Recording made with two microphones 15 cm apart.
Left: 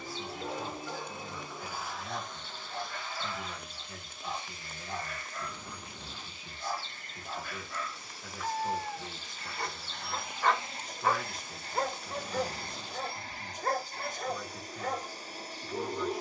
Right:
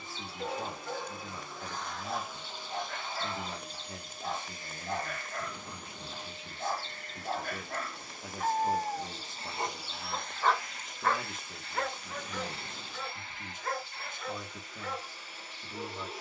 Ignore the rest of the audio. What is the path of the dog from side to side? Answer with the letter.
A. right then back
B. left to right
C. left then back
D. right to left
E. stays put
D.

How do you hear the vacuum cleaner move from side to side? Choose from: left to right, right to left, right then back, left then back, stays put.
right then back.